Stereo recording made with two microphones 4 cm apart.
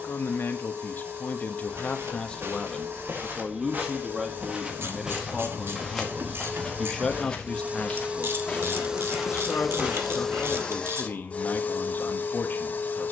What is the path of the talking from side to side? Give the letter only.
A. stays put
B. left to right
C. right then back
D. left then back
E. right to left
C.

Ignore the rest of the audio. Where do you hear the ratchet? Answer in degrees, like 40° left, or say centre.
60° right.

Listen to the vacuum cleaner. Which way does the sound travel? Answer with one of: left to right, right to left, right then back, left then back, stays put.
right to left.